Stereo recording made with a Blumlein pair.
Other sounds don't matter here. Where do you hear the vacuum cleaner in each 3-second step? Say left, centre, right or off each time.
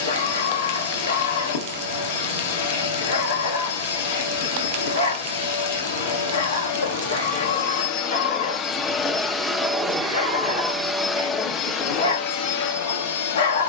left, left, left, centre, left.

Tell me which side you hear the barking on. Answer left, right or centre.
left.